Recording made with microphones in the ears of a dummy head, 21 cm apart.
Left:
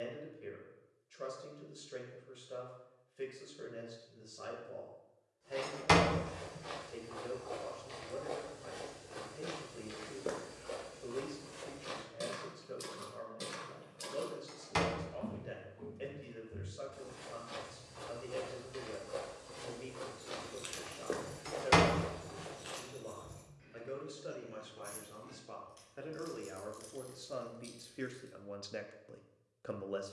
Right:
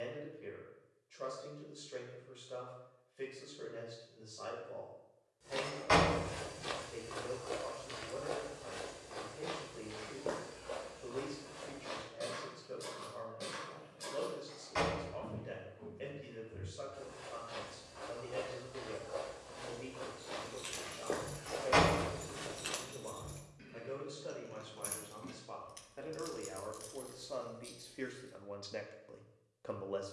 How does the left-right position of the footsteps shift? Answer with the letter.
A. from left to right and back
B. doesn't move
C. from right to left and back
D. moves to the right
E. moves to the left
C.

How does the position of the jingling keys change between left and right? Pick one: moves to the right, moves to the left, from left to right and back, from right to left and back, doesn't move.
from left to right and back.